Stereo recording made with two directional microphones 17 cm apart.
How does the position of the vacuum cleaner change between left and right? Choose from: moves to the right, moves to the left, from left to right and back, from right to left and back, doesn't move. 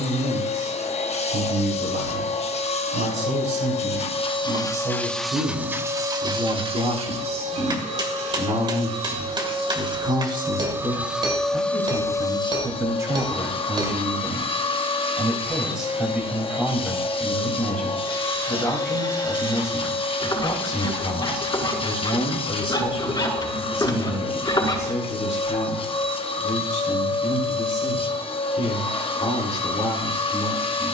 from left to right and back.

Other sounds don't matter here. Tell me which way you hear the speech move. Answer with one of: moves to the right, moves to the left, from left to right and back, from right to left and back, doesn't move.
moves to the left.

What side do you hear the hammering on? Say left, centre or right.
right.